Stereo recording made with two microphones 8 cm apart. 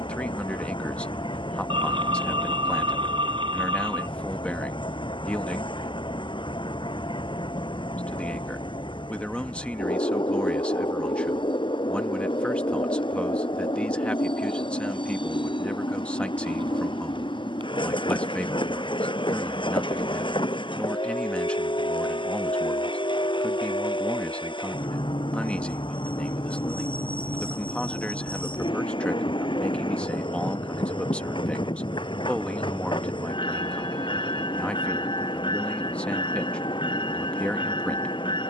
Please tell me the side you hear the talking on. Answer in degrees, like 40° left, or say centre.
10° left.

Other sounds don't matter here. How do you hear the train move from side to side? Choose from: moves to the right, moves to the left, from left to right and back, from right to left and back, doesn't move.
doesn't move.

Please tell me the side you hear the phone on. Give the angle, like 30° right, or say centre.
80° right.